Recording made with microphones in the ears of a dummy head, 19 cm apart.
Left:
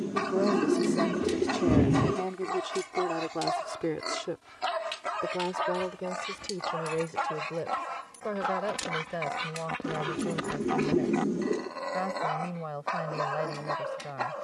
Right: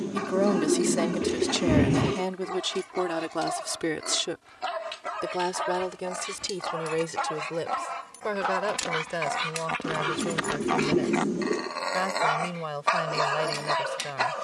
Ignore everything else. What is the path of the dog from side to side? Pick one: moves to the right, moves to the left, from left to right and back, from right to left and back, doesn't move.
moves to the right.